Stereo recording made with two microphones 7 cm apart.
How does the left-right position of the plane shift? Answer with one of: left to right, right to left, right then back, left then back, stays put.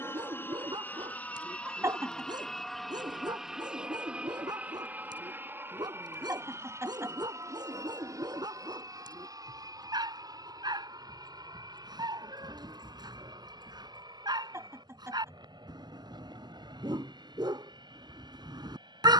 left to right.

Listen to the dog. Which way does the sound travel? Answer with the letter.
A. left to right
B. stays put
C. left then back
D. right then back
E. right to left
B.